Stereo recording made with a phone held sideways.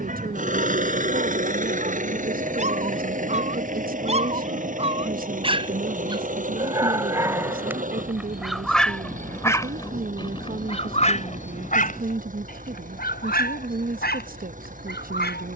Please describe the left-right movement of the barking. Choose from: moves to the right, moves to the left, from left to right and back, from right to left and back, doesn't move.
moves to the left.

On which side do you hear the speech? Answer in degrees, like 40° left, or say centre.
60° right.